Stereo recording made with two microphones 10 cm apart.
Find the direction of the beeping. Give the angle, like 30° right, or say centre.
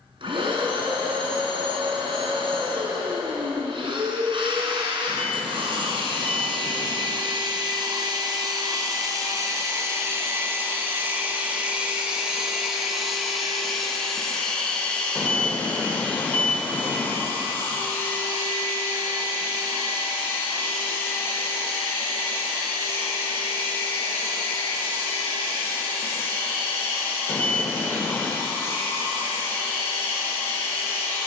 20° left.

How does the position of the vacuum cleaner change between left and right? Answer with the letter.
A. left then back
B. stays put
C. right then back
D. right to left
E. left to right
D.